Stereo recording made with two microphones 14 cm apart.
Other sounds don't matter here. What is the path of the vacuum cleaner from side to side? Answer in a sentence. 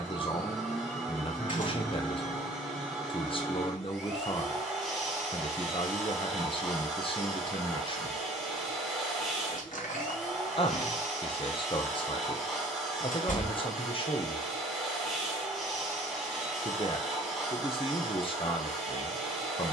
You can hear the vacuum cleaner stay put.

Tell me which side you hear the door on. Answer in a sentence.
You can hear the door on the left.